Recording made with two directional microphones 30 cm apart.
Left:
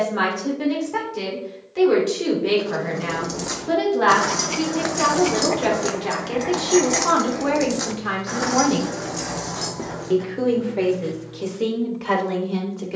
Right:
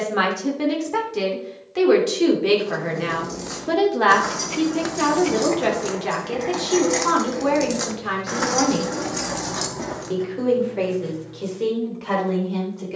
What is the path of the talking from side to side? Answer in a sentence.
You can hear the talking move to the left.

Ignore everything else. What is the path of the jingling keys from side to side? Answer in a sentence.
In this clip you hear the jingling keys go from the left side to the right.